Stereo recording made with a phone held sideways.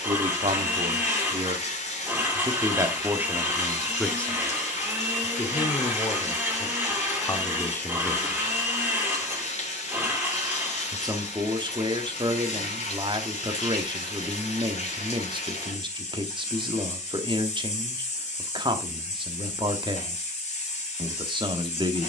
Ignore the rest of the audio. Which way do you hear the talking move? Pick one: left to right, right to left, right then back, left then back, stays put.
left then back.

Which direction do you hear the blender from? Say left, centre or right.
centre.